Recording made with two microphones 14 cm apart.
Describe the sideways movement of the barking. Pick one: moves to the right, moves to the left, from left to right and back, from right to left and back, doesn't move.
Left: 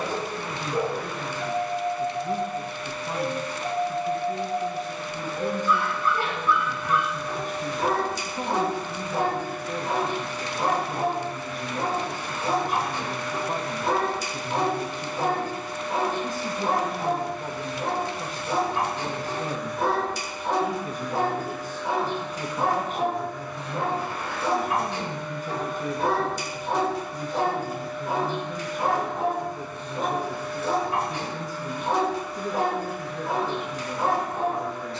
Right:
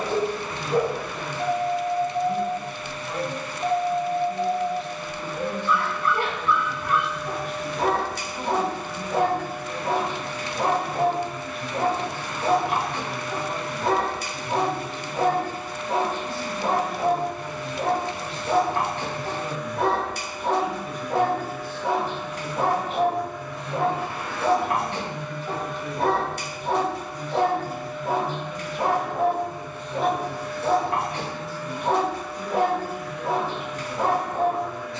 doesn't move.